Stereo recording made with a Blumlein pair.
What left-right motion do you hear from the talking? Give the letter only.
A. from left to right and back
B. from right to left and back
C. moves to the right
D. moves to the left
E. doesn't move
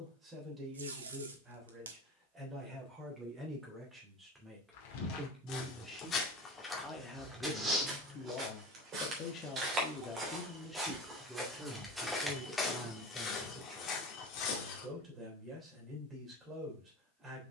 B.